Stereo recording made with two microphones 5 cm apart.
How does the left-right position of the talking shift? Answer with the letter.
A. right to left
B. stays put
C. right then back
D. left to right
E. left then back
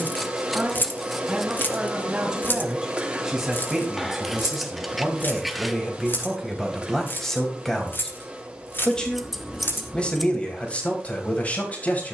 A.